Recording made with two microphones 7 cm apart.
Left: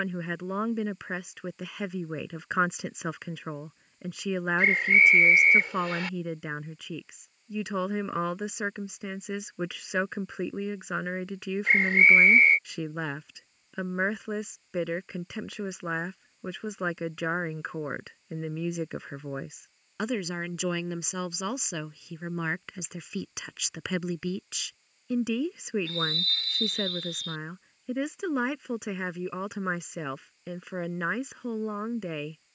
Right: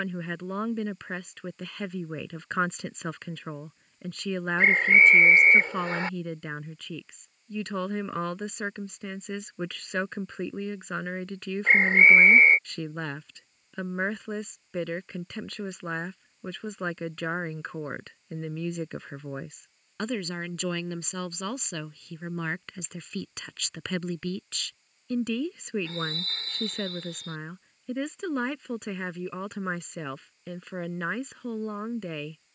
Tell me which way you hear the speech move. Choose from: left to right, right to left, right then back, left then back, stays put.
stays put.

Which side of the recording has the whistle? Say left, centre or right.
right.